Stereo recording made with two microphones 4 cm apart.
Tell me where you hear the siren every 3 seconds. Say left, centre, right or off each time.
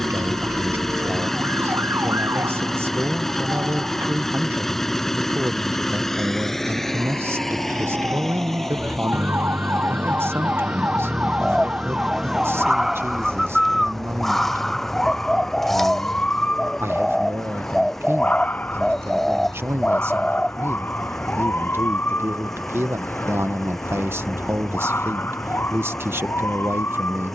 right, right, right, right, centre, left, left, left, left.